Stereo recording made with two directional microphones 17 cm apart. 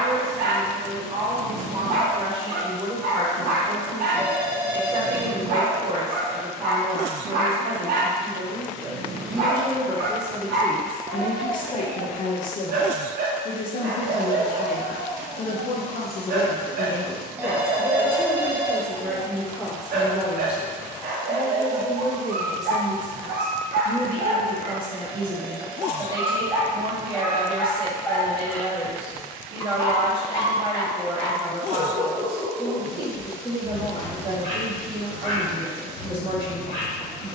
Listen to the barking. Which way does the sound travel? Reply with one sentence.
In this clip you hear the barking go from the right side to the left.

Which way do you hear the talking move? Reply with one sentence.
In this clip you hear the talking go left and come back.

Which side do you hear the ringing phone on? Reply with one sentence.
You can hear the ringing phone in the centre.